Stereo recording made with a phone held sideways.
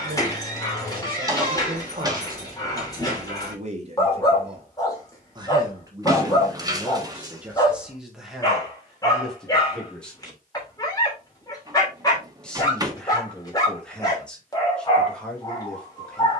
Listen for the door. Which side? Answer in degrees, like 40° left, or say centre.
20° right.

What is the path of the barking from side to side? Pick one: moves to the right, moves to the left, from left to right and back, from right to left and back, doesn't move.
doesn't move.